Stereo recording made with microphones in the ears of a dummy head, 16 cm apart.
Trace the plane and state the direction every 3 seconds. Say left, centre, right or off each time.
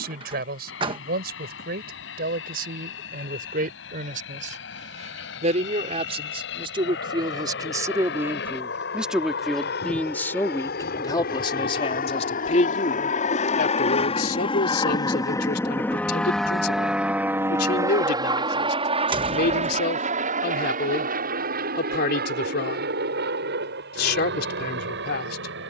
left, left, left, left, left, centre, right, right, right.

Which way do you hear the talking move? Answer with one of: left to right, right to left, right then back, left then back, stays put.
right to left.